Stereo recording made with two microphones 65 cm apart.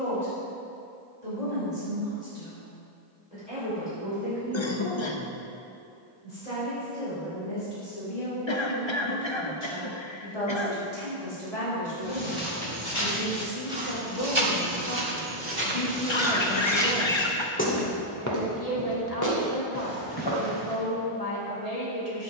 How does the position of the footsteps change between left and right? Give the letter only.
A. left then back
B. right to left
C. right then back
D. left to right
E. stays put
C.